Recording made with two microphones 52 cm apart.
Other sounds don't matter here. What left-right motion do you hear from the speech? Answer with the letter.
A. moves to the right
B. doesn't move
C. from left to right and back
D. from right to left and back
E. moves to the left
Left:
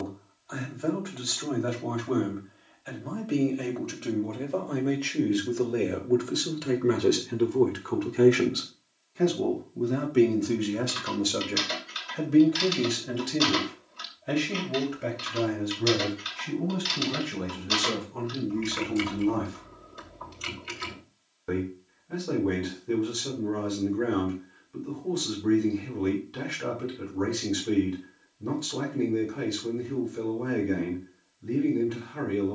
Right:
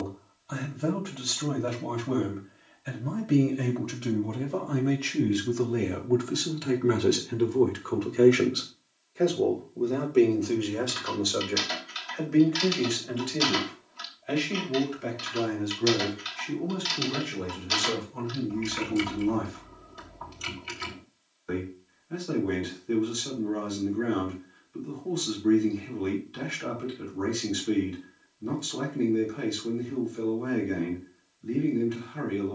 E.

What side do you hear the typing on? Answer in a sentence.
In this clip you hear the typing in the centre.